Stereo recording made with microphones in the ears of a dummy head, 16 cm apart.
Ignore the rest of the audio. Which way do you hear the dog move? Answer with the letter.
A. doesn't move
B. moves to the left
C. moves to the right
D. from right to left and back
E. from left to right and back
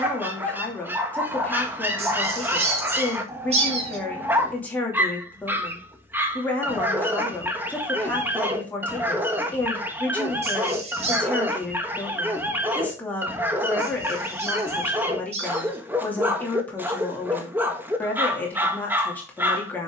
A.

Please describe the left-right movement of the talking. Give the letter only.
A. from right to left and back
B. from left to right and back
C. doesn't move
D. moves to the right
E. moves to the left
C.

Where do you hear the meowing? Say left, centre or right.
right.